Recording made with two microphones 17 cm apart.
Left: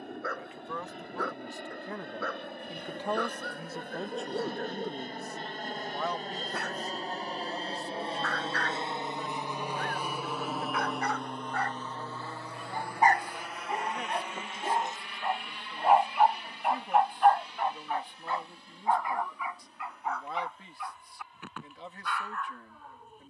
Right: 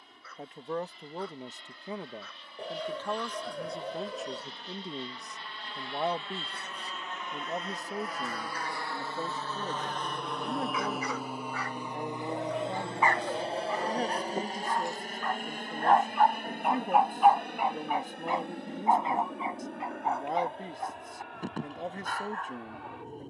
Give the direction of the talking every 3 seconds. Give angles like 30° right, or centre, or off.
20° right, centre, 40° right, 40° right, 40° right, 40° right, 40° right, 40° right.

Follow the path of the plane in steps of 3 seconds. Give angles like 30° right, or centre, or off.
60° left, 50° left, 30° left, centre, 30° right, 50° right, 60° right, 60° right.